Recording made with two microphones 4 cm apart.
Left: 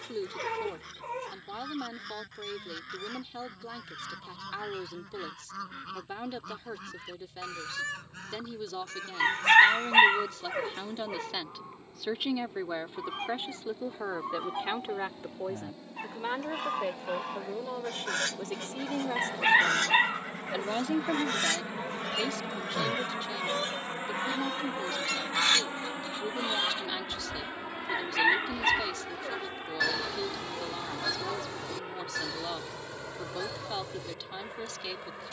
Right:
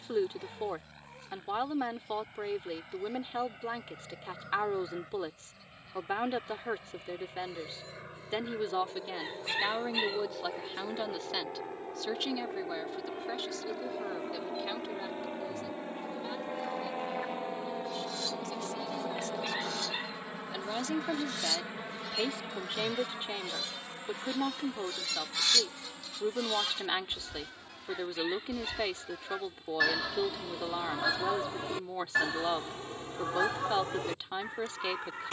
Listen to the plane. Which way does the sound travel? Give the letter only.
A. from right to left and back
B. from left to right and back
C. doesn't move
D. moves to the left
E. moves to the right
D.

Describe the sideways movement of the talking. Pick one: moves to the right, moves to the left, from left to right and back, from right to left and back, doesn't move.
from right to left and back.